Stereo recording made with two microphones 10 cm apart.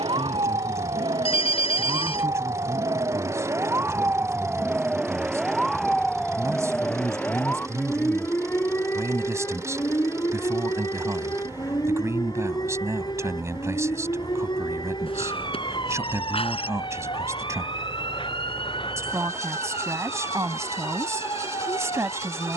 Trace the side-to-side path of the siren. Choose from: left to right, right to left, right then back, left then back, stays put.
right to left.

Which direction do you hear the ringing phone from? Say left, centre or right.
left.